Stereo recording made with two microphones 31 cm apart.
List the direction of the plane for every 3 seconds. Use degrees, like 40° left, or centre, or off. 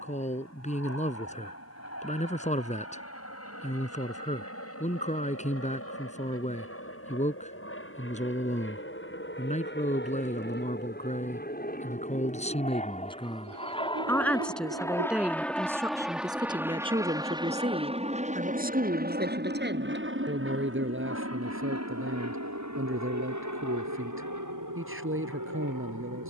50° left, 50° left, 40° left, 30° left, 20° left, 10° right, 30° right, 50° right, 60° right.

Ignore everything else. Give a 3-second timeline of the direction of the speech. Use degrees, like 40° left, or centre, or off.
20° left, 20° left, 20° left, 20° left, 10° left, 10° right, 30° right, 40° right, 40° right.